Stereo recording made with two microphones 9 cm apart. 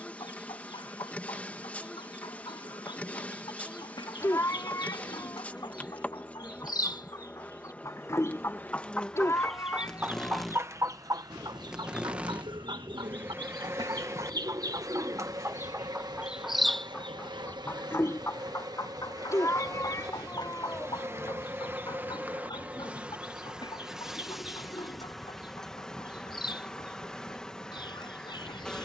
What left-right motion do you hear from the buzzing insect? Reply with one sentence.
You can hear the buzzing insect go right and come back.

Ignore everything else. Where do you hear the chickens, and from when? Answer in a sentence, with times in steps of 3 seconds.
In this clip you hear the chickens on the left from 0 s, on the right from 9 s, in the centre from 15 s and on the left from 18 s.